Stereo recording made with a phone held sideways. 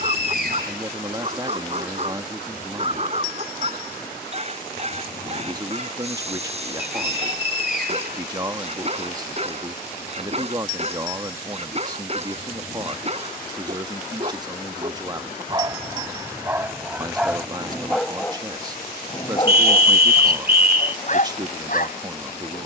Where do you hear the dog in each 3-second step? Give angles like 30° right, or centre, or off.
40° right, 40° right, 40° right, 40° right, 40° right, 10° right, 30° left, 50° left.